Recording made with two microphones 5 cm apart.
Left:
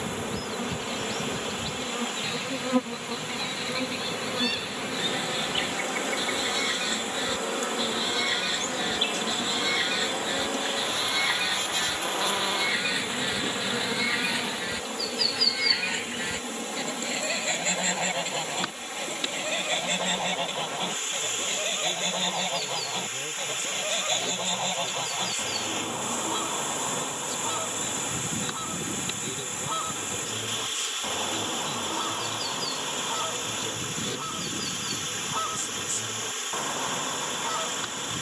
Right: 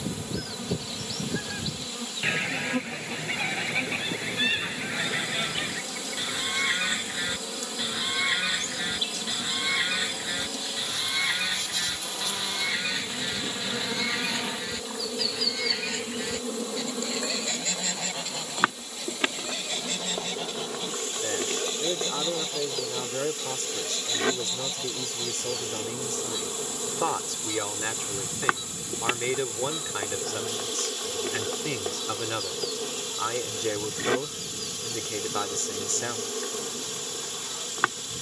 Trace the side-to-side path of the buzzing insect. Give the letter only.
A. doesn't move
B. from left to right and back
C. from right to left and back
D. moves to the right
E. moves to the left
D.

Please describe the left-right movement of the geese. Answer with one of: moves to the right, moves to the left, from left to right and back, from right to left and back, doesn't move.
moves to the left.